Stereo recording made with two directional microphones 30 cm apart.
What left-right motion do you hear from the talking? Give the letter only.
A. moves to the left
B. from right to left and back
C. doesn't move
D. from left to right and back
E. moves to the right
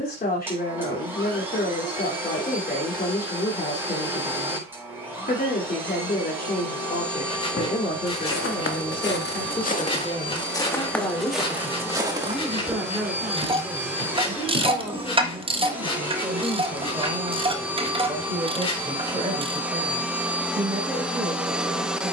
E.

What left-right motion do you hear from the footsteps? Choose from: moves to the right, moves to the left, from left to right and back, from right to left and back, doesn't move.
moves to the right.